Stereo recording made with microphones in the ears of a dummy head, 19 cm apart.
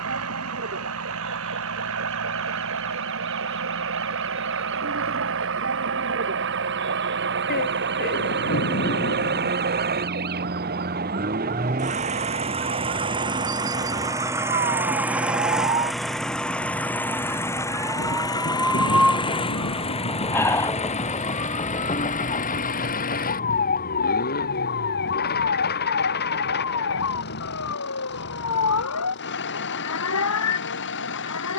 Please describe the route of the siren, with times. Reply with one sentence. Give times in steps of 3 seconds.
You can hear the siren on the right from 0 s, in the centre from 18 s and on the left from 21 s.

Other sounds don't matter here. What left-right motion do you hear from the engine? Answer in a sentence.
You can hear the engine move to the left.